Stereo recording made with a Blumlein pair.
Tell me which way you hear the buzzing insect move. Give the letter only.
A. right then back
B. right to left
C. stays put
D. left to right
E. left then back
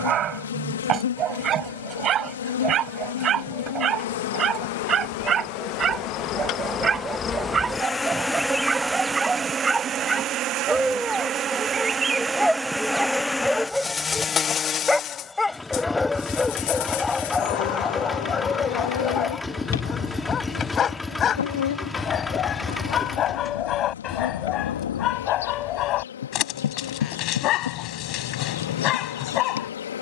A.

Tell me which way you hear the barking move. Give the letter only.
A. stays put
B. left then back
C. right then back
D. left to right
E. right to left
E.